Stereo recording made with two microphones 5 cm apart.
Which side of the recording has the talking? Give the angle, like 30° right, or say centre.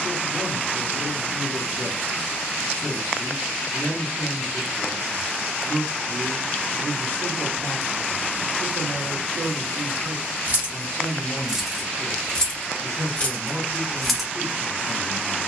50° right.